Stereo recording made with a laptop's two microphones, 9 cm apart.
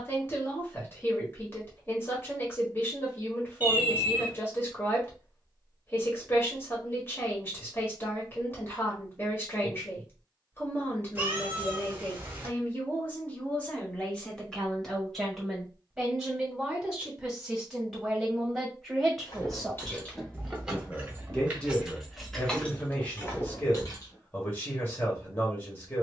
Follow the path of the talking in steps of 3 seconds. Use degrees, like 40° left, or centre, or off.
30° left, 30° left, 30° left, 30° left, 20° left, centre, centre, 20° left, 30° left.